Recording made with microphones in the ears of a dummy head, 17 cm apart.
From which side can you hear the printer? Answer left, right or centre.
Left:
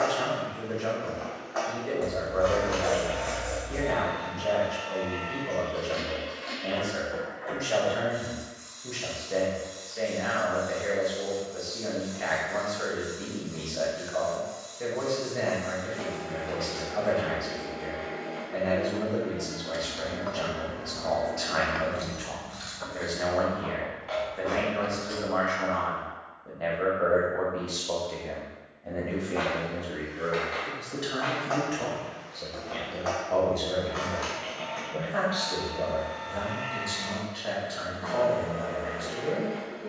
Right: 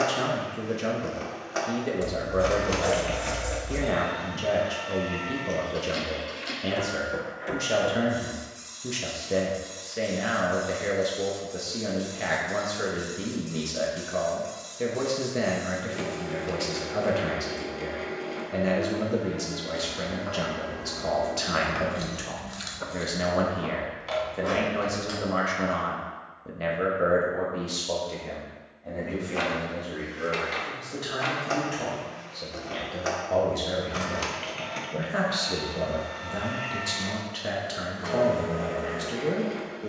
right.